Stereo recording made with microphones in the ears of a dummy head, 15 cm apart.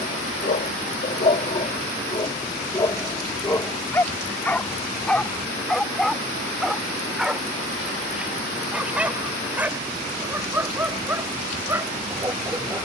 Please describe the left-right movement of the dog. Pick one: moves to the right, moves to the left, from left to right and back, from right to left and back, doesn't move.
moves to the right.